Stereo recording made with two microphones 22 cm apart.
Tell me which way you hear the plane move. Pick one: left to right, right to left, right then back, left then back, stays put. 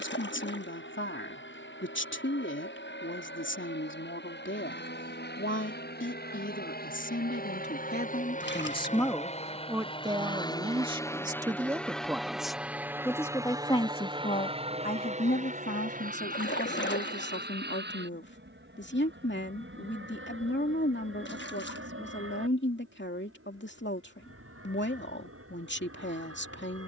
left to right.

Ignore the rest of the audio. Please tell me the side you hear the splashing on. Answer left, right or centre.
left.